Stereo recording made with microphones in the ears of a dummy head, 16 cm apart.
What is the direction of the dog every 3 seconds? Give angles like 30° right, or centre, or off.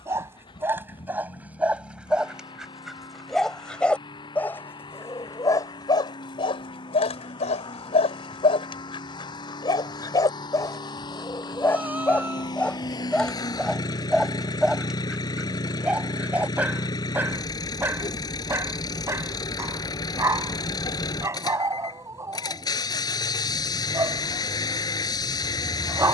10° right, 10° left, 30° left, 20° left, centre, 10° right, 20° right, 20° right, 20° right.